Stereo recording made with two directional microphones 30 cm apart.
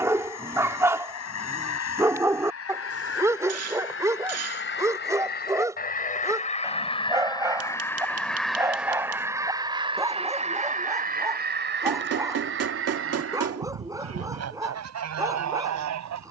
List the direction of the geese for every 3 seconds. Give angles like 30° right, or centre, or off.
50° left, 40° left, 10° left, 20° right, 50° right, 60° right.